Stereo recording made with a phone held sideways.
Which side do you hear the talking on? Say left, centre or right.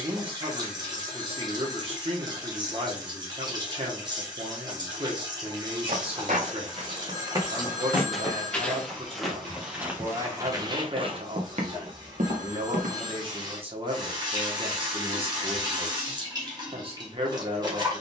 right.